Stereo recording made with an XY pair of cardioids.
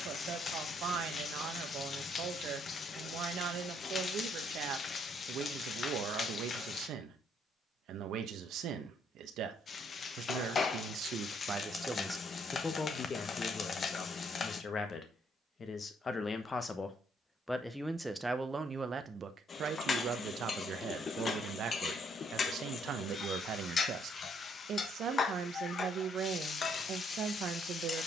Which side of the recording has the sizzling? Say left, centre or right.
left.